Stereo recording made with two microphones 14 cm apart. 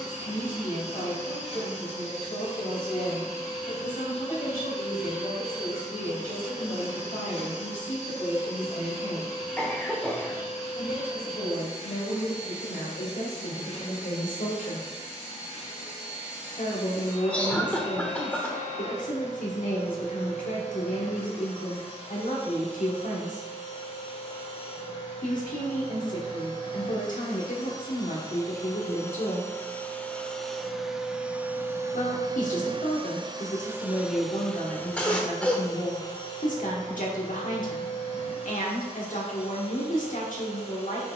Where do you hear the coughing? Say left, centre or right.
centre.